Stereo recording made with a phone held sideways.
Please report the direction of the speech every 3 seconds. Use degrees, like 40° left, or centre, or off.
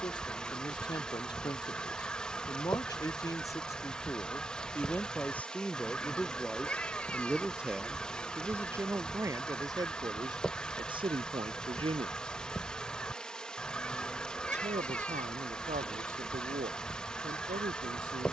30° left, 20° left, 10° right, 30° right, 50° right, 60° right.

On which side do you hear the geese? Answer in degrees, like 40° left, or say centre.
10° left.